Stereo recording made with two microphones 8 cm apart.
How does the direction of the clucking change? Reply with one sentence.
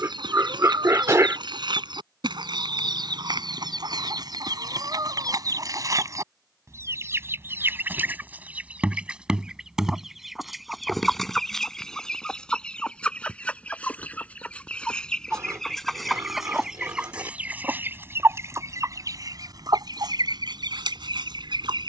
In this clip you hear the clucking go left and come back.